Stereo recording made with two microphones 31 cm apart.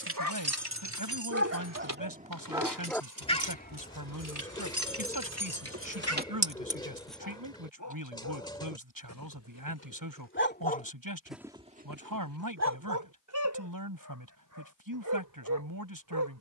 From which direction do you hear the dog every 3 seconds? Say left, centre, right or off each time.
right, left, left, left, right, right.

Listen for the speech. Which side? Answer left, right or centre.
right.